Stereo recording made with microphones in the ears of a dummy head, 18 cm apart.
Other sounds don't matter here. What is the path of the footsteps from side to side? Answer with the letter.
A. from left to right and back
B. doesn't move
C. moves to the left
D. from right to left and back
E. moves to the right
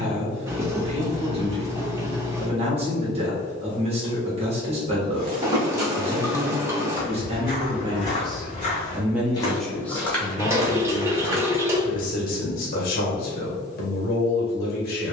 D.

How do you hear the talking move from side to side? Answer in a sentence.
In this clip you hear the talking move to the left.